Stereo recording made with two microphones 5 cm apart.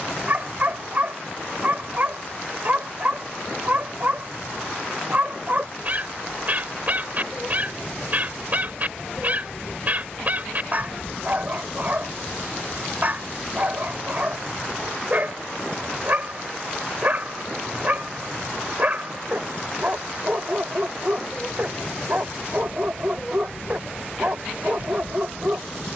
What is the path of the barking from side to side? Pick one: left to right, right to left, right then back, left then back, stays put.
stays put.